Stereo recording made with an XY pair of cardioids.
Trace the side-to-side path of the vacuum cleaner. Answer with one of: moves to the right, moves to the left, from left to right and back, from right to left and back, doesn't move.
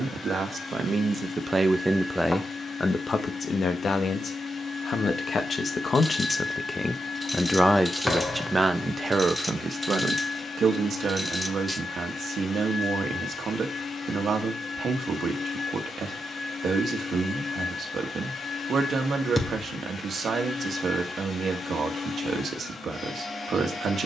doesn't move.